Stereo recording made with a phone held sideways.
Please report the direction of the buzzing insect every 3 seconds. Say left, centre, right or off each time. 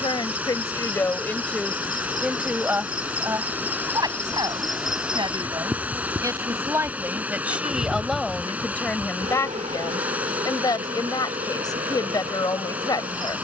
left, centre, right, right, right.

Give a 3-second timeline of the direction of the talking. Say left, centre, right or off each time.
centre, right, centre, left, left.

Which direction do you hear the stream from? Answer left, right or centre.
centre.